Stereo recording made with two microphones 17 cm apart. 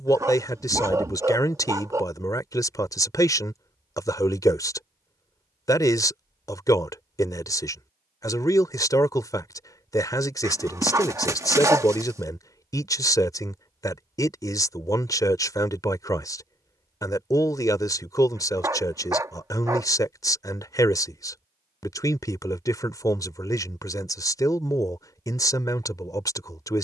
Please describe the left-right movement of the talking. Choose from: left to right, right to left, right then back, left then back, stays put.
stays put.